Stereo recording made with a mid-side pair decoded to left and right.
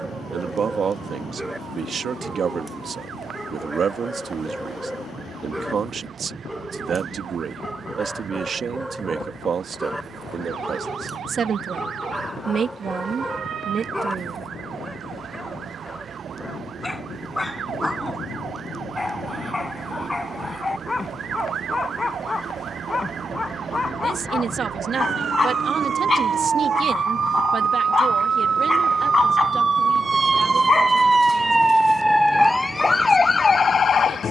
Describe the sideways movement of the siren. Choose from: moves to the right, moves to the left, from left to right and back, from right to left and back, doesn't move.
moves to the left.